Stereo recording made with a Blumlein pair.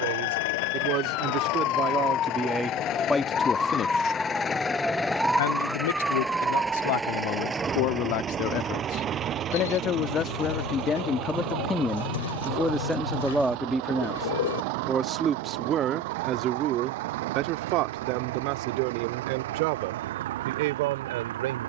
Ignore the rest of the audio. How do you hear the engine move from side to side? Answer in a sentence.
In this clip you hear the engine go from the left side to the right.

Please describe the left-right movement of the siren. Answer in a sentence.
You can hear the siren move to the right.